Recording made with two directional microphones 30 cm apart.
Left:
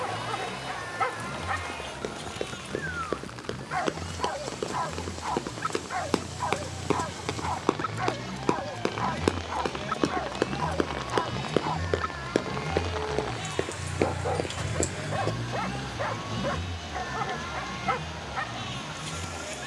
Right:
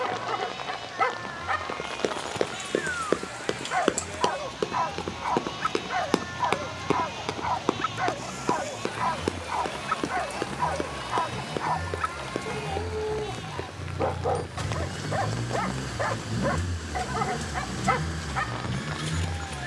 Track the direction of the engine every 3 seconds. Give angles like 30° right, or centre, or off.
50° left, 50° left, 40° left, 30° left, 10° left, 30° right, 60° right.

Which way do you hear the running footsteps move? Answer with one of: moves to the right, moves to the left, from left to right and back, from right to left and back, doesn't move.
moves to the left.